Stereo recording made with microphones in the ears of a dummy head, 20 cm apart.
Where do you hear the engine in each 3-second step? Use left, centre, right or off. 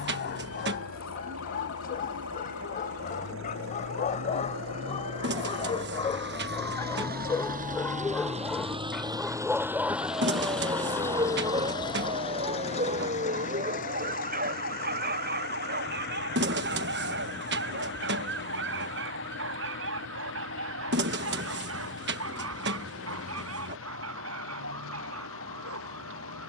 right, right, right, centre, left, left, left, left, left.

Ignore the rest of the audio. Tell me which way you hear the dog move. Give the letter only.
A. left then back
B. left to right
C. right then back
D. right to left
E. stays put
B.